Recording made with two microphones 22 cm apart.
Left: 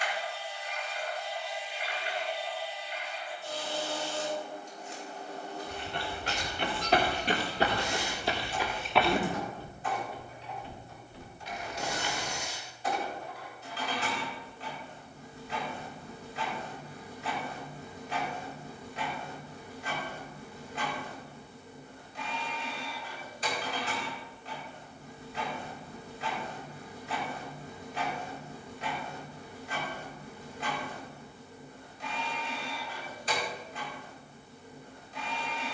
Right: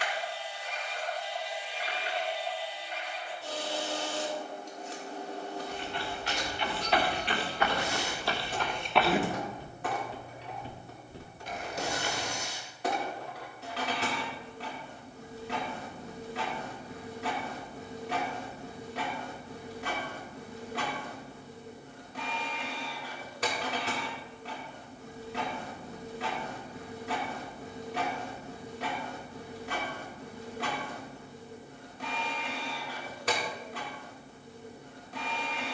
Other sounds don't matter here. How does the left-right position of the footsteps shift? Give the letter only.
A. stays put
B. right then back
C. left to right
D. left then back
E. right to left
C.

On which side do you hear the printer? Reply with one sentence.
You can hear the printer on the right.